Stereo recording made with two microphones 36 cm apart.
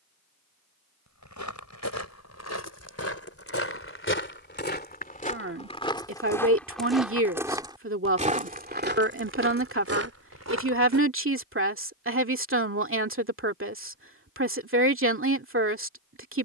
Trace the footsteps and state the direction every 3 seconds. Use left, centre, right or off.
left, left, centre, right, off, off.